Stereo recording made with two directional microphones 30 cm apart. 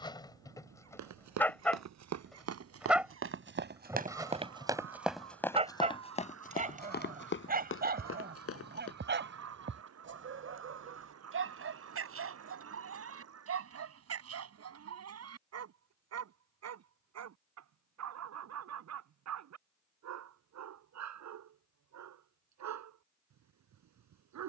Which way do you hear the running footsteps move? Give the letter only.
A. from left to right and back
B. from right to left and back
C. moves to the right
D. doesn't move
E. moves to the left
E.